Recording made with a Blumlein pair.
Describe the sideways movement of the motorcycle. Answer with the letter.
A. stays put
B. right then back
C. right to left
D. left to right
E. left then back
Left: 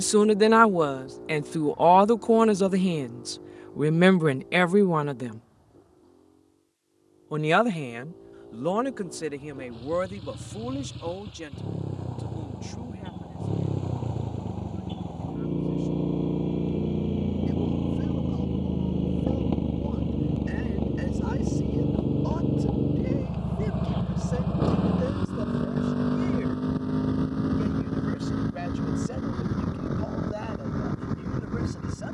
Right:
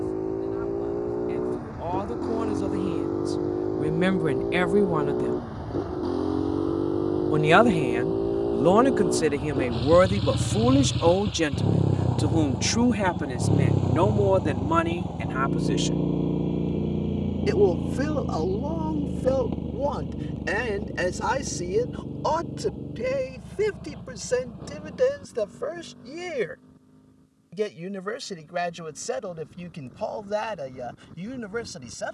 C.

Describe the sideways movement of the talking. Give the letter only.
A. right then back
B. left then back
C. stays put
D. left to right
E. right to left
D.